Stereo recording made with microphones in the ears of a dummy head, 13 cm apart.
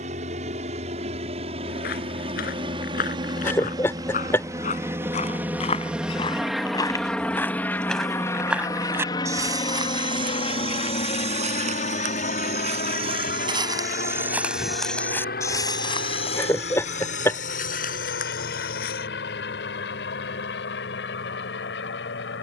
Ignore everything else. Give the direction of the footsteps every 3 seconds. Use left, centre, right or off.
left, left, centre, right, right, left, left, off.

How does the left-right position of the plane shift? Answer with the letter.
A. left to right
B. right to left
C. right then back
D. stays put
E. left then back
B.